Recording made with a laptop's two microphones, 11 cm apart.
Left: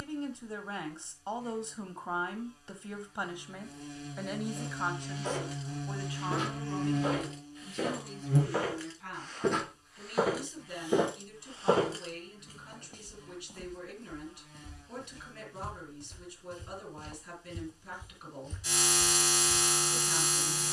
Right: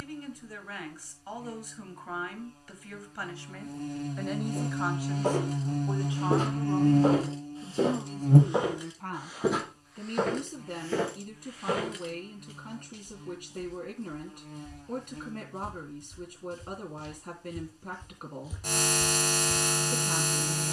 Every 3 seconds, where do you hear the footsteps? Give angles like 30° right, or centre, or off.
off, 50° right, 30° right, 10° left, 50° left, 50° left, centre.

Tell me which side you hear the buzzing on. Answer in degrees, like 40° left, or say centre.
50° right.